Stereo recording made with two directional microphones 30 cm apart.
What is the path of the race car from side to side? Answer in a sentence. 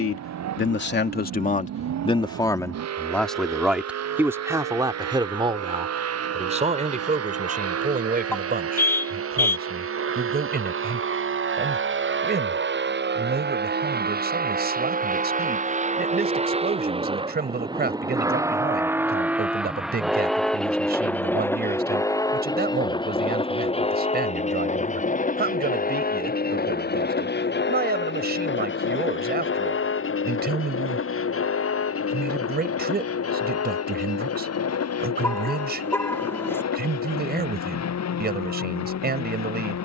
You can hear the race car move to the left.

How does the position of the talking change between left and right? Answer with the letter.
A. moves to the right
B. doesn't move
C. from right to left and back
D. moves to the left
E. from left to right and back
A.